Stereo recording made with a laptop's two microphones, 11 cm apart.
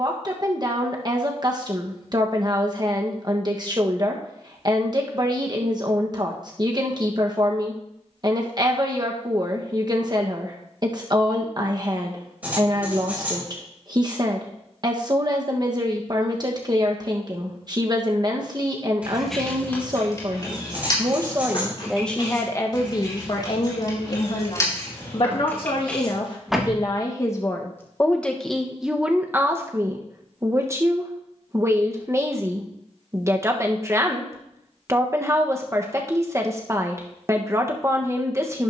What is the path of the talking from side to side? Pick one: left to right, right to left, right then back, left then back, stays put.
left then back.